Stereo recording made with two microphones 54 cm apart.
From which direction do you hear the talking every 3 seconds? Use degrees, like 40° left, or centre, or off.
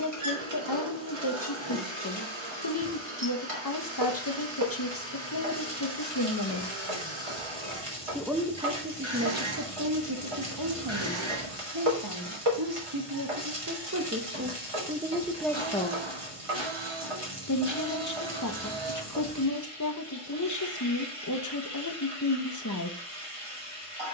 40° left, 40° left, 20° left, 40° right, 30° right, 10° left, 30° left, 30° left.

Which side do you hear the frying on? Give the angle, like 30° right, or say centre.
70° right.